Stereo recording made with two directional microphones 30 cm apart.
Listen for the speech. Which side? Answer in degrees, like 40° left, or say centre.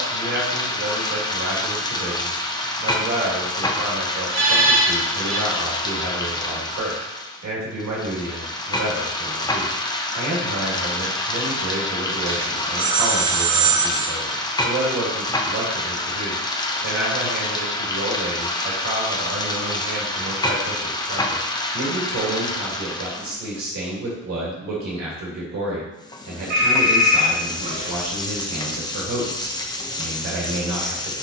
60° right.